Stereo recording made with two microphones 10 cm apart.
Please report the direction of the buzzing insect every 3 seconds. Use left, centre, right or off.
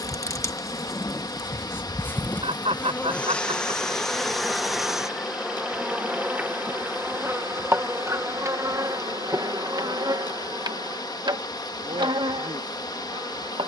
left, centre, right, right, right.